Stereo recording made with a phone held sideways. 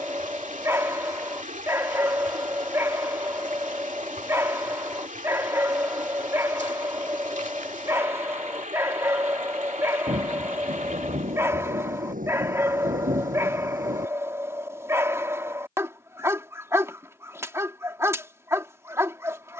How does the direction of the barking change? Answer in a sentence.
You can hear the barking stay put.